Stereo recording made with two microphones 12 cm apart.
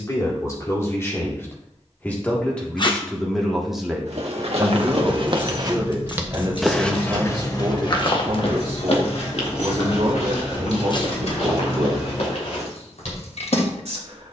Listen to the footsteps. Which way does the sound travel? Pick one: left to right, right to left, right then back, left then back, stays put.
right to left.